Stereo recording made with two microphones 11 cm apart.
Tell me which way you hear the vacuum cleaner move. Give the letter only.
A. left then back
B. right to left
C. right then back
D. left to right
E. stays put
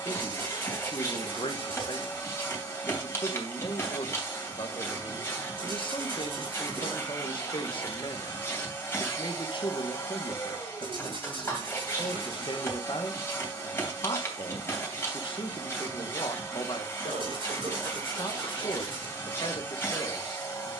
E.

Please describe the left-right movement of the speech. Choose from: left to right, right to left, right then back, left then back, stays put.
stays put.